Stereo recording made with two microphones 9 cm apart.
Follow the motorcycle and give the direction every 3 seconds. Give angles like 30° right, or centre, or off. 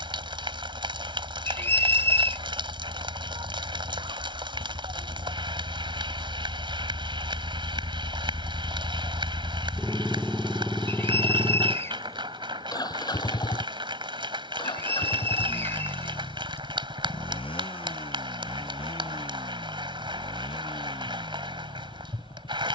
70° right, 60° right, 30° right, 10° left, 50° left, 70° left, 70° left, 80° left.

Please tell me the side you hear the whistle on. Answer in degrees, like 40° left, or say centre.
30° left.